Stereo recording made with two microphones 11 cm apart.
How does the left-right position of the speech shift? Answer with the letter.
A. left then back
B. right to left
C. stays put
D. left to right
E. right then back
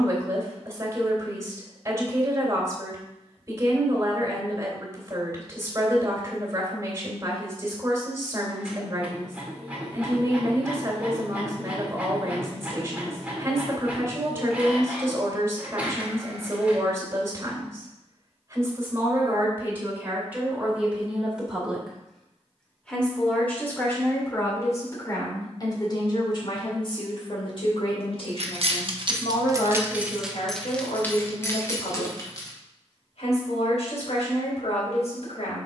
B.